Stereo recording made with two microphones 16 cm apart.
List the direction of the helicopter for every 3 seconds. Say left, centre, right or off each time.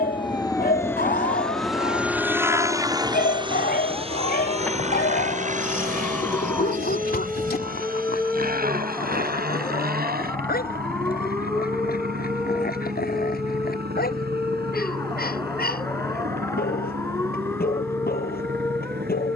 centre, right, right, right, right, right, right.